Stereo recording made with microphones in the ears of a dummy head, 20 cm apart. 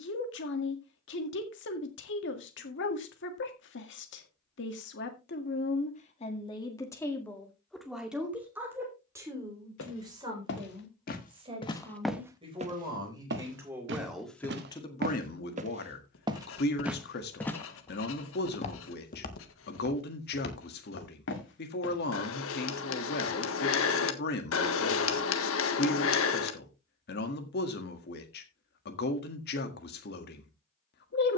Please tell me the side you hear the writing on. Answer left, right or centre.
left.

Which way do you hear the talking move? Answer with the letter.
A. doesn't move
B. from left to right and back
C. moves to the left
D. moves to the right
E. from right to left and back
B.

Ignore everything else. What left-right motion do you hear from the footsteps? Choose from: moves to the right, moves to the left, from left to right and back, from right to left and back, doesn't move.
from left to right and back.